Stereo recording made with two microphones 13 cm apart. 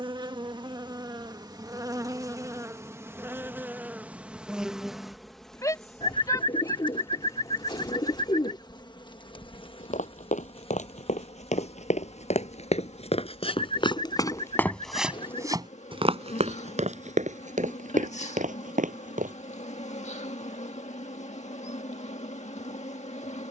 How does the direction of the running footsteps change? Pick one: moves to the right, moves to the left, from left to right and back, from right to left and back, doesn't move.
moves to the right.